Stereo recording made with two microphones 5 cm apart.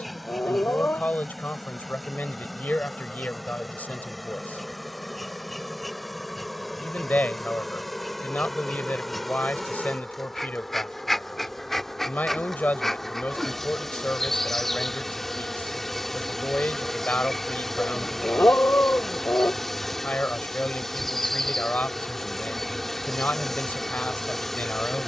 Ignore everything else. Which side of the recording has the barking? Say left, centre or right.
left.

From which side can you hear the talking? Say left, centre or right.
left.